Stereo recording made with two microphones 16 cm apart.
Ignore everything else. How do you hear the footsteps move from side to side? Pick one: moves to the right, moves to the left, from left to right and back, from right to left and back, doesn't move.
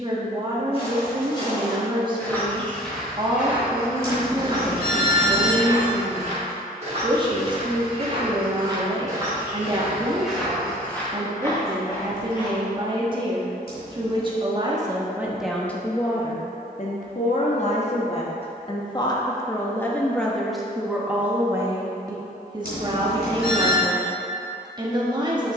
from left to right and back.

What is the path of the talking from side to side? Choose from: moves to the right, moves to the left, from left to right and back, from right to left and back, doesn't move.
from right to left and back.